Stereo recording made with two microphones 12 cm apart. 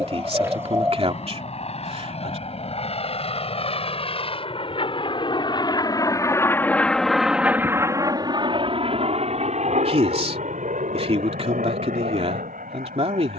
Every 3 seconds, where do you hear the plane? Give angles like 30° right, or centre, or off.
70° left, 50° left, 10° right, 60° right, 70° right.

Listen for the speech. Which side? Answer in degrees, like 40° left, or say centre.
50° right.